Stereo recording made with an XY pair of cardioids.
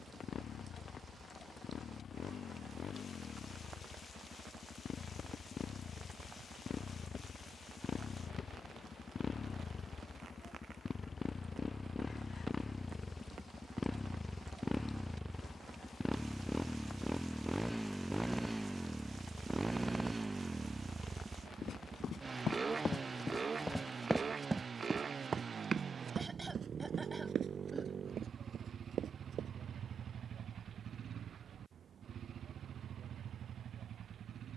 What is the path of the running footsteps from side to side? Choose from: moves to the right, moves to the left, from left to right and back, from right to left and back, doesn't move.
moves to the right.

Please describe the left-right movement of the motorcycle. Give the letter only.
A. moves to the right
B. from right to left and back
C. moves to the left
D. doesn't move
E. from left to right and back
A.